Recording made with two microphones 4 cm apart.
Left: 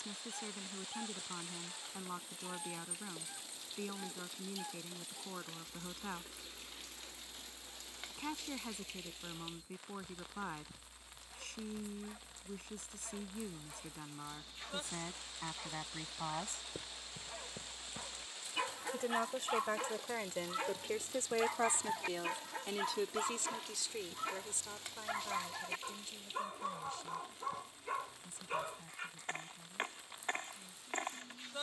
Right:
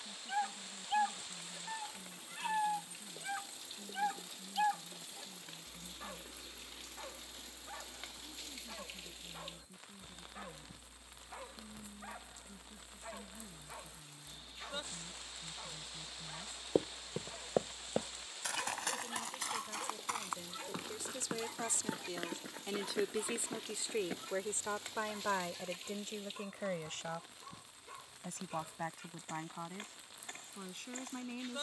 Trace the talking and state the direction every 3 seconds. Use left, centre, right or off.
left, left, left, left, left, left, left, centre, right, right, right.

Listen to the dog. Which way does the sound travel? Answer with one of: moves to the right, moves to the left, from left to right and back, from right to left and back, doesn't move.
moves to the left.